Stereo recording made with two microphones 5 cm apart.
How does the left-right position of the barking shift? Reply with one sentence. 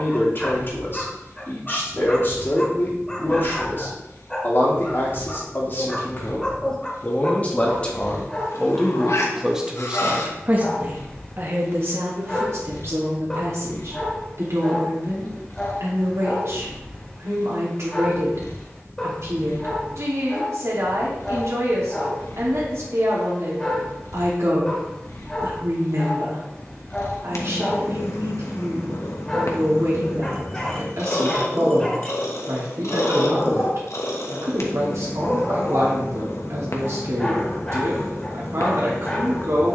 In this clip you hear the barking stay put.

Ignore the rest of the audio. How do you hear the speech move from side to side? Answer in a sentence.
You can hear the speech travel towards the right.